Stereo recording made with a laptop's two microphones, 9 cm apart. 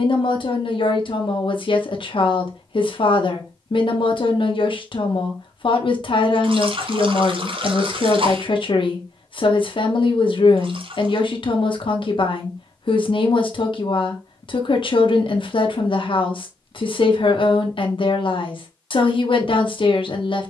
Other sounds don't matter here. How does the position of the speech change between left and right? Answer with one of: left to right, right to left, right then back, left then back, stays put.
stays put.